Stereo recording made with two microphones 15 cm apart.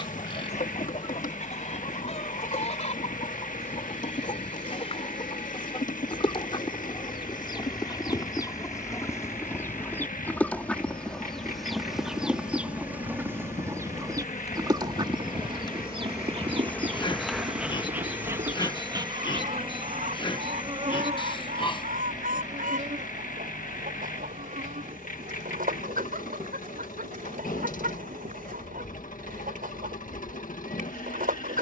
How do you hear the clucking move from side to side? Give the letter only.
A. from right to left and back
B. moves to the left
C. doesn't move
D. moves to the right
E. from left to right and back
D.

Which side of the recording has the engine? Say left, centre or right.
left.